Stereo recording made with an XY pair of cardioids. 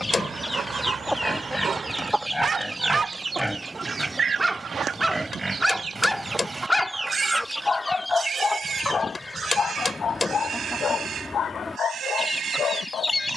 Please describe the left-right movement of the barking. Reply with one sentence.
You can hear the barking move from right to left.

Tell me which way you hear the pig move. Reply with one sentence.
In this clip you hear the pig move from left to right.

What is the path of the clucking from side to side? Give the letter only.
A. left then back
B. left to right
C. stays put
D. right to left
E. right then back
E.